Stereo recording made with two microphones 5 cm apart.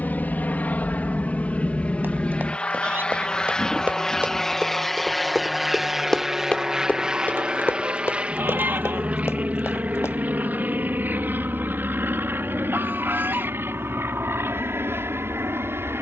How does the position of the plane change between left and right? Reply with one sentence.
You can hear the plane move to the right.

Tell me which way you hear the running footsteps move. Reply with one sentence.
You can hear the running footsteps move to the left.